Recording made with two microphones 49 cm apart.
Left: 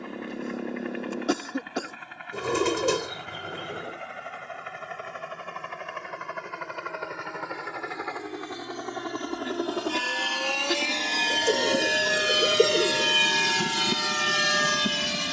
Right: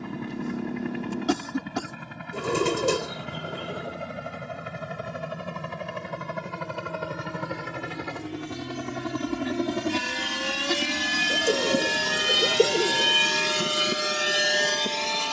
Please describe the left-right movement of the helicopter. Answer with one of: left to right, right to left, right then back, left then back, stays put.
right to left.